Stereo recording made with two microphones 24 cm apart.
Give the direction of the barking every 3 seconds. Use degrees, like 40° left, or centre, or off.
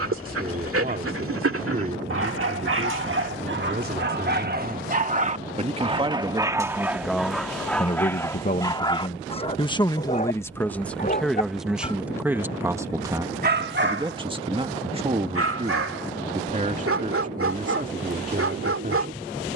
60° right, 40° right, centre, 30° left, 40° right, 70° right, 70° right.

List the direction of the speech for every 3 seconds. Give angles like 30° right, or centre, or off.
40° right, 30° right, 10° left, 10° left, 20° right, 30° right, 30° right.